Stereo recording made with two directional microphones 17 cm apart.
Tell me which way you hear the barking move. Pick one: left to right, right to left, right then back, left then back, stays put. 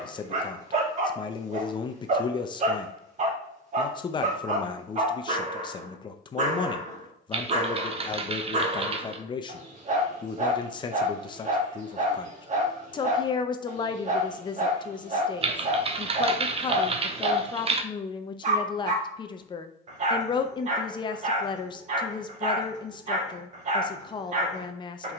stays put.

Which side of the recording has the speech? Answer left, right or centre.
left.